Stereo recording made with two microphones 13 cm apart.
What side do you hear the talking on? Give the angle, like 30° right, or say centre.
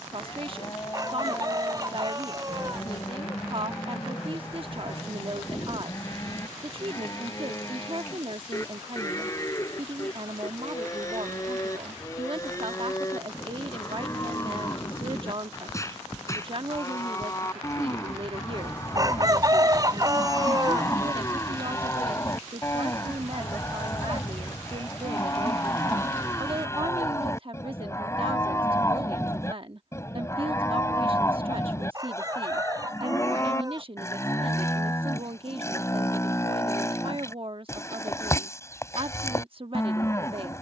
40° right.